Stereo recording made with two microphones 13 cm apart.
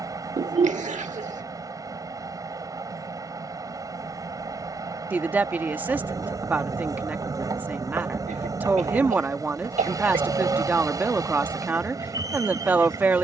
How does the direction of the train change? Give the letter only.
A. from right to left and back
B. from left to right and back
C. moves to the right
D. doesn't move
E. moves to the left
D.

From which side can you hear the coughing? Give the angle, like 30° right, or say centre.
70° right.